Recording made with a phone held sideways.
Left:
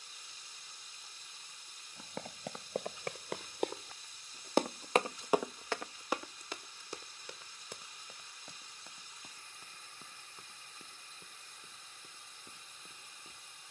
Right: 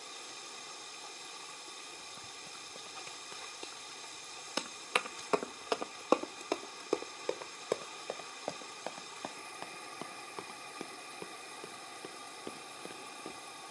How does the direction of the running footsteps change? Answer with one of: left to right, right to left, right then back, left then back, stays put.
left to right.